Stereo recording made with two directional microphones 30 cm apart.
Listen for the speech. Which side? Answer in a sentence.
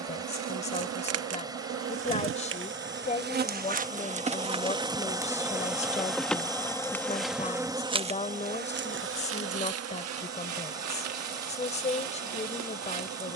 You can hear the speech on the left.